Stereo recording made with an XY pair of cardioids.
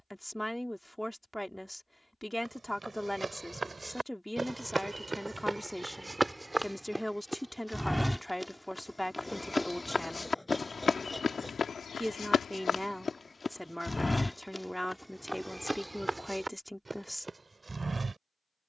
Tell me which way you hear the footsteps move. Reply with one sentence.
In this clip you hear the footsteps move from right to left and back again.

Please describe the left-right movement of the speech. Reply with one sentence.
You can hear the speech stay in one place.